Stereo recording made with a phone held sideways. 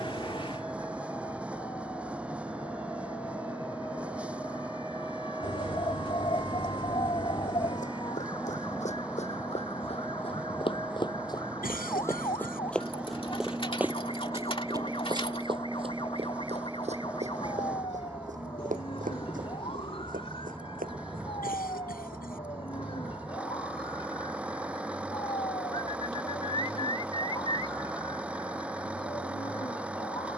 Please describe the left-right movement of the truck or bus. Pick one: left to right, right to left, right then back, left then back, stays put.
stays put.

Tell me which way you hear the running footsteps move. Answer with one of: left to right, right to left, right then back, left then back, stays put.
left to right.